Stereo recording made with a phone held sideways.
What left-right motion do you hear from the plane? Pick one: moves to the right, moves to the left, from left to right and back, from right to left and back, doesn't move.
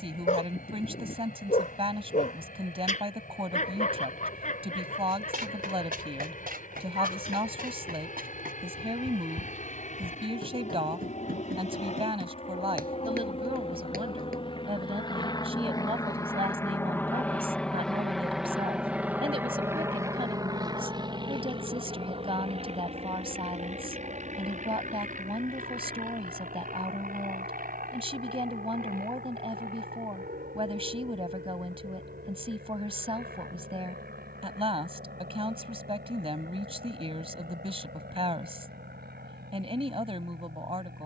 moves to the right.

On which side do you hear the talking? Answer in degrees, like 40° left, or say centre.
40° right.